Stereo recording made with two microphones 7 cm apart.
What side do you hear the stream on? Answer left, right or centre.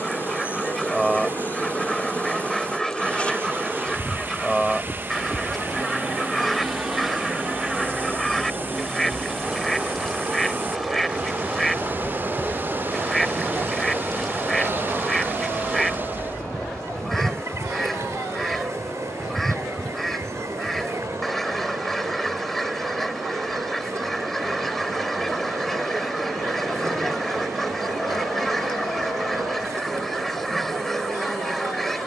right.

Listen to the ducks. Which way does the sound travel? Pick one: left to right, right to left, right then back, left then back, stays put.
stays put.